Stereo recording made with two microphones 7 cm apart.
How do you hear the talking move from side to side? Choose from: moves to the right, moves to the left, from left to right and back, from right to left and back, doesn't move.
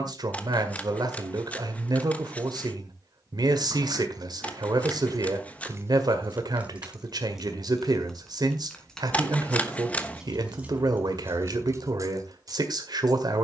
doesn't move.